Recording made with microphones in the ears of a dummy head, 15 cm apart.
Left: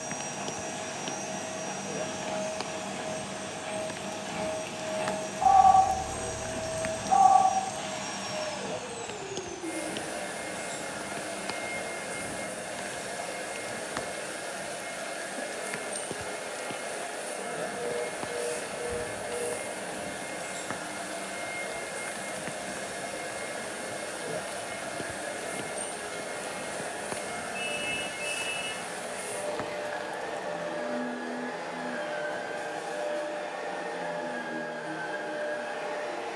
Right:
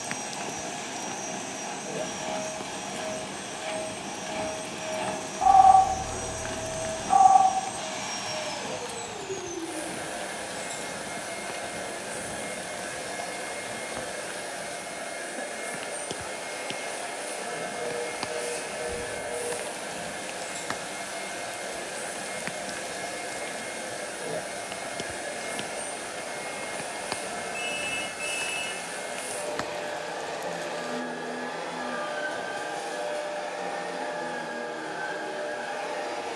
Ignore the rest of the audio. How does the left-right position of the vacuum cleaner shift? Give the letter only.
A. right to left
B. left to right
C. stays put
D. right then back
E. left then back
B.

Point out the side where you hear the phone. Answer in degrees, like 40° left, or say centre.
50° right.